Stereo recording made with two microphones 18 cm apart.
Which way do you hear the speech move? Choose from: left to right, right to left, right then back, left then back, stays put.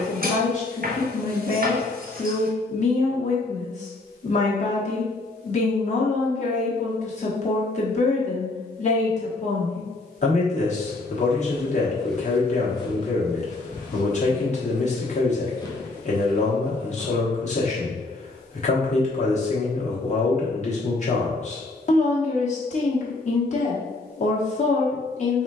stays put.